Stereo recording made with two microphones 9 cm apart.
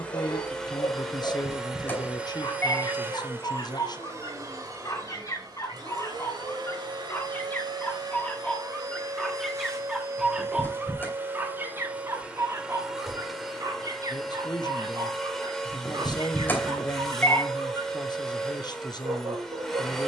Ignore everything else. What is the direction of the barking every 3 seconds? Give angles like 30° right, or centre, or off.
60° left, 40° left, 20° left, 10° right, 40° right, 60° right, 70° right.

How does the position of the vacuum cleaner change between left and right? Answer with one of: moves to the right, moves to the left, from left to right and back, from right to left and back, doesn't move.
from left to right and back.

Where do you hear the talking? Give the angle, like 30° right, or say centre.
50° left.